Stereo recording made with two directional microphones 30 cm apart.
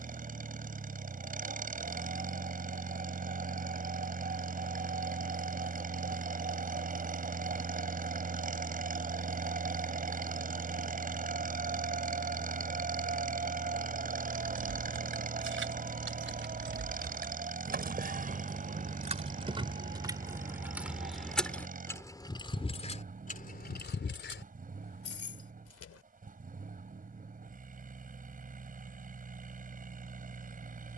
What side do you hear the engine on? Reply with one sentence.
In this clip you hear the engine on the right.